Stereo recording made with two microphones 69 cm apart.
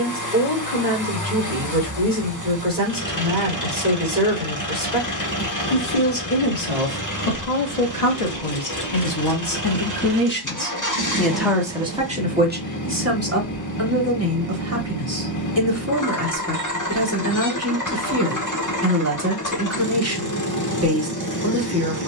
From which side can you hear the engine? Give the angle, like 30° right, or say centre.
30° left.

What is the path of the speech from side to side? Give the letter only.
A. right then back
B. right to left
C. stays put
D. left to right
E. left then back
D.